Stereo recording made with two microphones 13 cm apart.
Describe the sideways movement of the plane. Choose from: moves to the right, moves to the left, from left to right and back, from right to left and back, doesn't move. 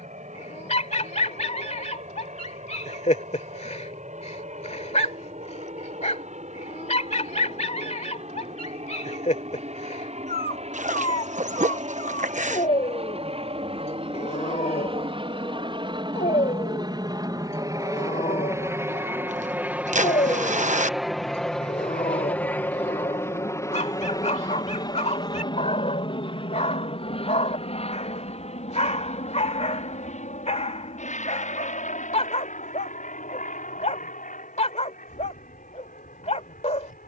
moves to the left.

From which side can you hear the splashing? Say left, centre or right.
right.